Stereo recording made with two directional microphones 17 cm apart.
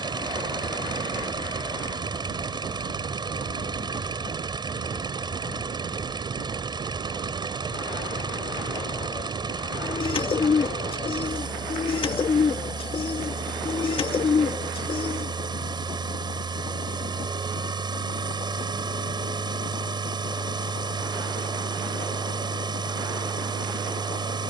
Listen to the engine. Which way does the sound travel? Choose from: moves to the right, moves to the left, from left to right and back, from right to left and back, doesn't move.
doesn't move.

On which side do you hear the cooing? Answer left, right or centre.
left.